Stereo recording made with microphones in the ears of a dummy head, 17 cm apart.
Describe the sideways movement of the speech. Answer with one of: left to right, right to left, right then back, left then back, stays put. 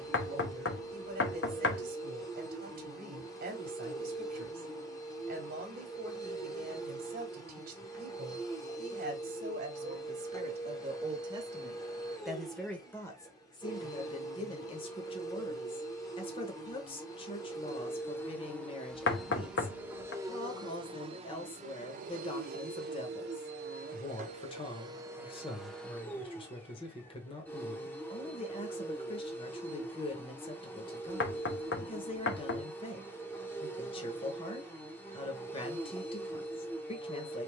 right to left.